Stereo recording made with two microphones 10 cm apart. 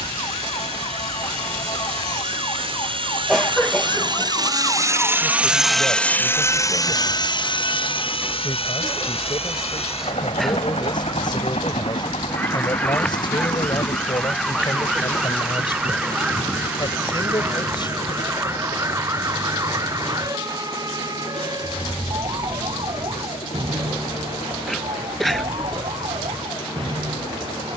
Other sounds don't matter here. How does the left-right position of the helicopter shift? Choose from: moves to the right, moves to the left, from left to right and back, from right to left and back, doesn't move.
moves to the left.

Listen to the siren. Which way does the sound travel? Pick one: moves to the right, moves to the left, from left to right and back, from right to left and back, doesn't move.
moves to the right.